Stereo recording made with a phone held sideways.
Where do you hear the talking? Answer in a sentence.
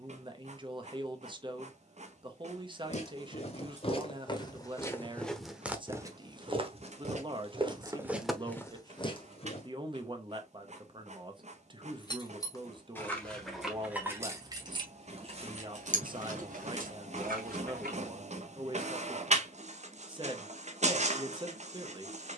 In this clip you hear the talking on the right.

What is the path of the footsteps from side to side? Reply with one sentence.
In this clip you hear the footsteps go right and come back.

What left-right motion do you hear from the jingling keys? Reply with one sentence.
You can hear the jingling keys move to the right.